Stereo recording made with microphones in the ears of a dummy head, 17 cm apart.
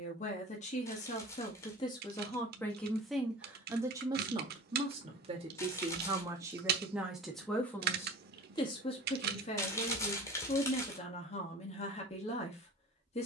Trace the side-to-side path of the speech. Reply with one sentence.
You can hear the speech go right and come back.